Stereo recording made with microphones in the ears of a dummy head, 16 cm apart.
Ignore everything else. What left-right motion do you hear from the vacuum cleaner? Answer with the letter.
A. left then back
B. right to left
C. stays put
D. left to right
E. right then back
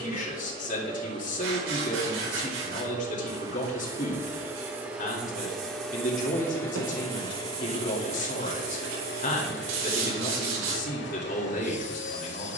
B.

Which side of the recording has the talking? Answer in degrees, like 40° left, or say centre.
40° left.